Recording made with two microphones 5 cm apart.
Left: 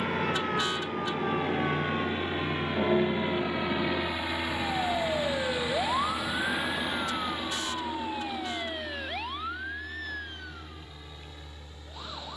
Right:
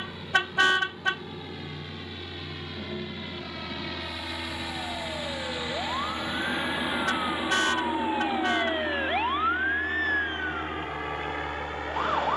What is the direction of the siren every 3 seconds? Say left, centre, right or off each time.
left, left, centre, right.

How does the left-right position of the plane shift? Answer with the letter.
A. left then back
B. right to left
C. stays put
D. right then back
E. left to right
E.